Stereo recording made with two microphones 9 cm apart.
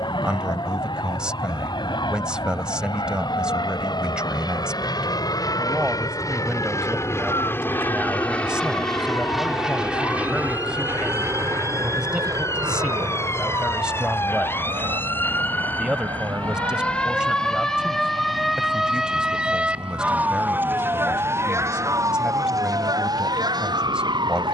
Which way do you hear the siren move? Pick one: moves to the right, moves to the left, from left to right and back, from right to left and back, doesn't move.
moves to the right.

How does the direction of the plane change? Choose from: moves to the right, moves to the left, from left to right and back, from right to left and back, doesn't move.
moves to the right.